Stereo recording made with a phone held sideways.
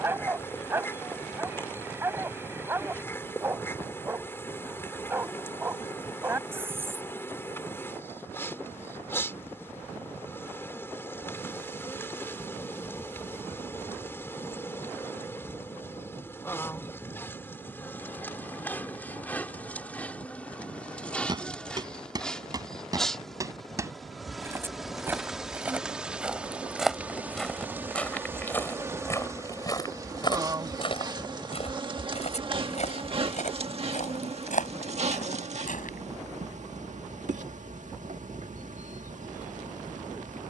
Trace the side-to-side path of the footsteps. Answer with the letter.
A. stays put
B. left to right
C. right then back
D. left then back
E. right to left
E.